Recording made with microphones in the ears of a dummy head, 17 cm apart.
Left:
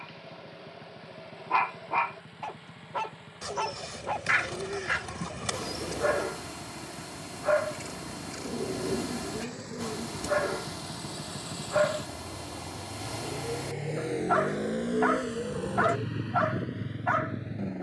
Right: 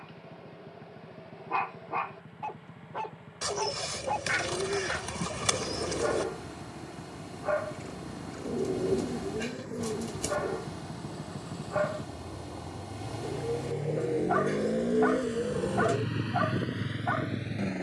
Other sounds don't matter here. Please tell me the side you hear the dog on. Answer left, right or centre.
left.